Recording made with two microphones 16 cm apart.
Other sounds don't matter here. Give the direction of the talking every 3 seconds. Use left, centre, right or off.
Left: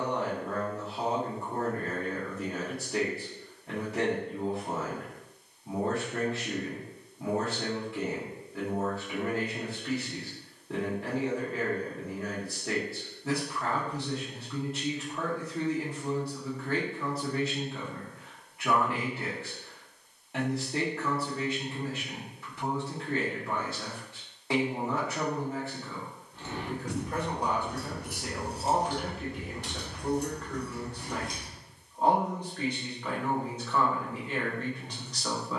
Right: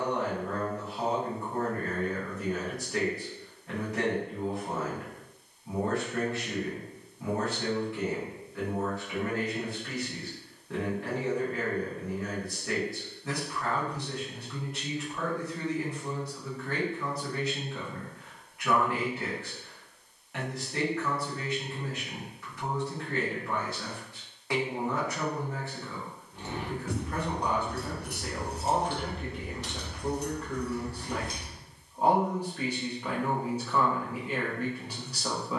left, left, left, left, left, left, left, left, left, centre, centre, centre.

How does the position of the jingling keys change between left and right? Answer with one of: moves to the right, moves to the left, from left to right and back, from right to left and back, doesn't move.
from right to left and back.